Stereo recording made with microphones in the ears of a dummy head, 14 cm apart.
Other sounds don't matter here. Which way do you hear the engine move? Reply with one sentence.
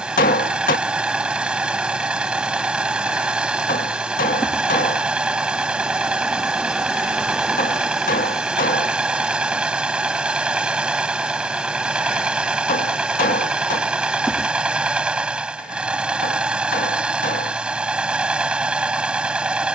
You can hear the engine stay in one place.